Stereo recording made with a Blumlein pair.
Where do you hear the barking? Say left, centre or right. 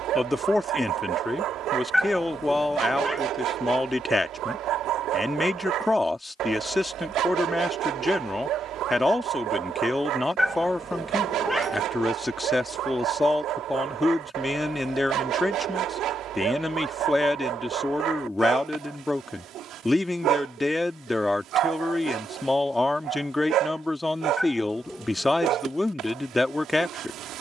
right.